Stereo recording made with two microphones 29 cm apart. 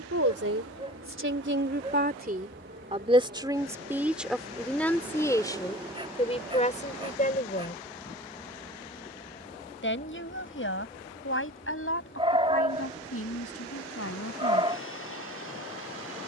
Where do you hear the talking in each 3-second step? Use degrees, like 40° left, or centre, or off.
40° right, centre, 30° left, 50° left, 50° left, off.